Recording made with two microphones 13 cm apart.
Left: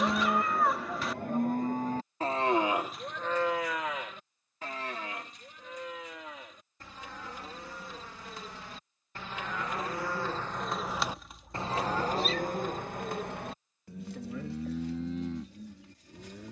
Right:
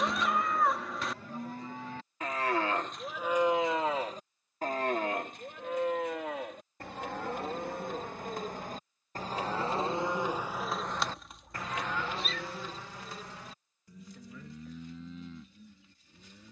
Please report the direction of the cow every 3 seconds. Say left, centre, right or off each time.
left, right, right, centre, left, left.